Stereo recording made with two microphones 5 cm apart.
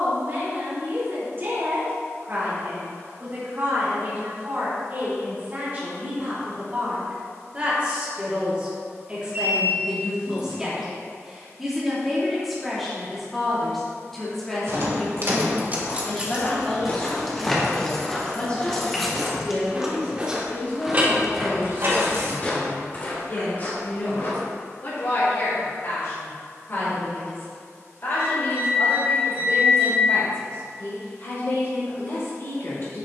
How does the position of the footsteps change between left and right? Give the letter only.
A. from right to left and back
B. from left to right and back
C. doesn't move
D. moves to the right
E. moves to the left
B.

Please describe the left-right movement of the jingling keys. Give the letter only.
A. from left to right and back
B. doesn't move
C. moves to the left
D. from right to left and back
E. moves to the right
D.